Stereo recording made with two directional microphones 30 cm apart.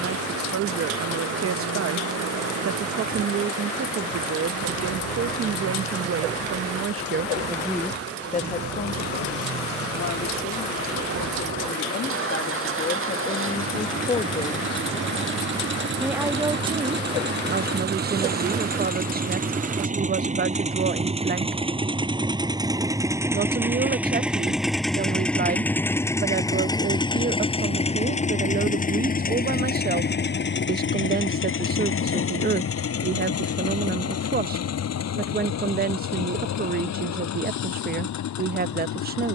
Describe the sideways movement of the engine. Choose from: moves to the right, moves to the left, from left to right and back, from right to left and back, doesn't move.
moves to the left.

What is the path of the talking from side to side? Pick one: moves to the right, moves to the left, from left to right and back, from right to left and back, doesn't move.
from right to left and back.